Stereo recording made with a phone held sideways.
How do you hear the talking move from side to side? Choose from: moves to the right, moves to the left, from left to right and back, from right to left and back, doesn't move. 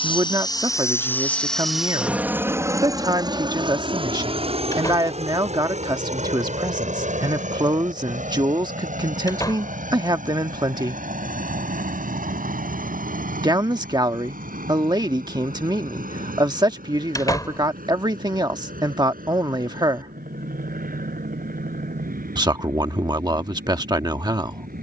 doesn't move.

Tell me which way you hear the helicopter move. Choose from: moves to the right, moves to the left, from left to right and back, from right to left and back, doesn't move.
moves to the right.